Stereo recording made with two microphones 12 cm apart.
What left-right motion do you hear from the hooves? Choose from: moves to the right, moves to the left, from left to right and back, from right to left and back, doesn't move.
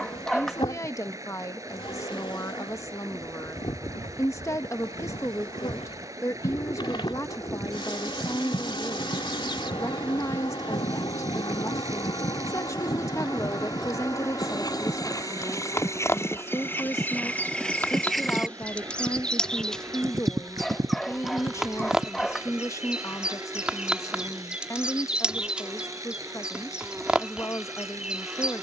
moves to the right.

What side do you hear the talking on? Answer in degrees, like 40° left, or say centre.
20° left.